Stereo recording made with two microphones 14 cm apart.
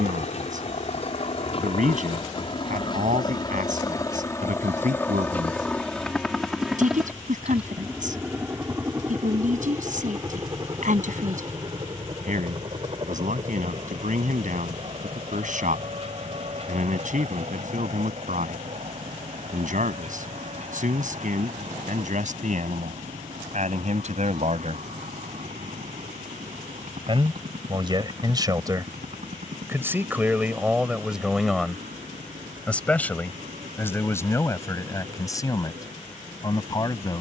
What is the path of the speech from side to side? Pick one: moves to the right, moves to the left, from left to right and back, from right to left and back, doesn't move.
moves to the left.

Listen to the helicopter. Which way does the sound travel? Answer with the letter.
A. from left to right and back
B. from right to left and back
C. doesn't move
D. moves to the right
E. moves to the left
D.